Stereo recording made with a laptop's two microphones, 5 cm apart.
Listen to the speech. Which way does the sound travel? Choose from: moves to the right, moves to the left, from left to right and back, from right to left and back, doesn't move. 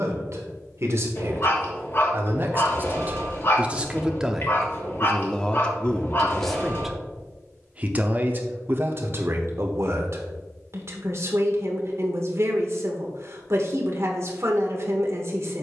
from right to left and back.